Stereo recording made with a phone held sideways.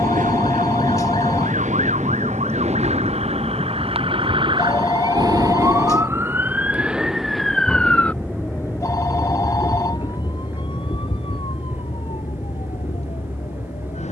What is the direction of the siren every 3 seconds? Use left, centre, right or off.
right, right, centre, left, left.